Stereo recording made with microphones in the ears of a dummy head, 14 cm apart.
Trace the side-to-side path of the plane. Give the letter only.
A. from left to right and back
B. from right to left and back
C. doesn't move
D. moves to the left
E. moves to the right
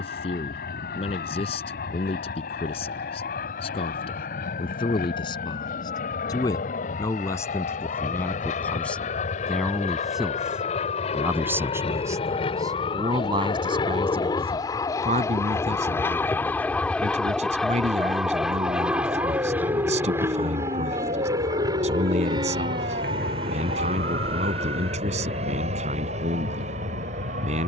E.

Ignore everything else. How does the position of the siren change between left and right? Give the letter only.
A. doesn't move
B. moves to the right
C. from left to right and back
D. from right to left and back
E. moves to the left
B.